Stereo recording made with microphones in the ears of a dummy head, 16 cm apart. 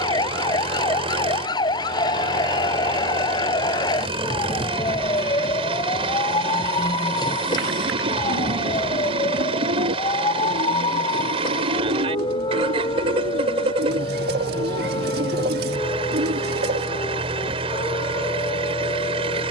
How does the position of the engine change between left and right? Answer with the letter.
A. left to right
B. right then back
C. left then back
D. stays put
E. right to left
D.